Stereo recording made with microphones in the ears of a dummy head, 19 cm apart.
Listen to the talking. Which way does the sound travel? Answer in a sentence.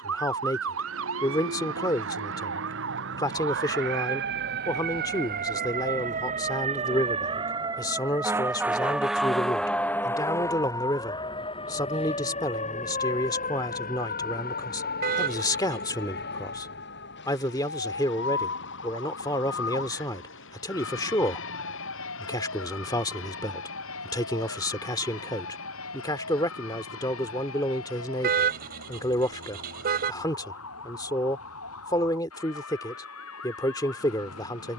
You can hear the talking stay in one place.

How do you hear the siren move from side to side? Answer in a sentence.
You can hear the siren go from the right side to the left.